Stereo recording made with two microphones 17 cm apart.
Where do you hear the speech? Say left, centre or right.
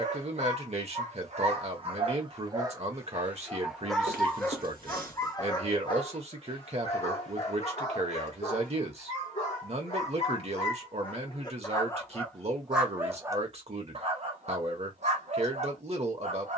right.